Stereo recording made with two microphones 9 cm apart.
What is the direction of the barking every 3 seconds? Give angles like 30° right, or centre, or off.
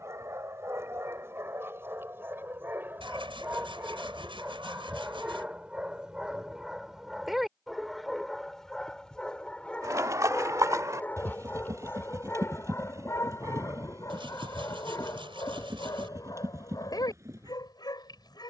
30° right, 20° right, centre, 20° left, 30° left, 50° left.